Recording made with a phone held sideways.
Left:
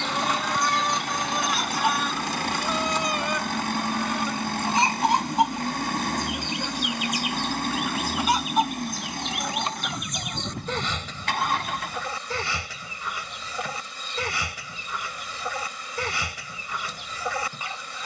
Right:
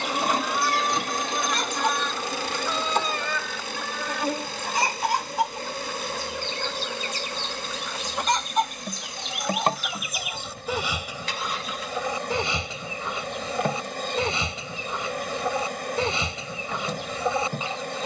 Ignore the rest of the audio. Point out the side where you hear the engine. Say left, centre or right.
left.